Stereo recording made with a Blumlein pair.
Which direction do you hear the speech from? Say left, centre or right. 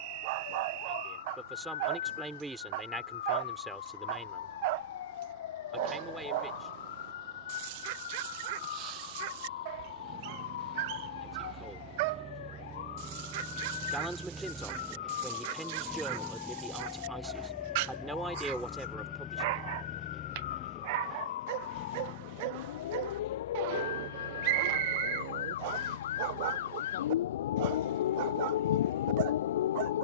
centre.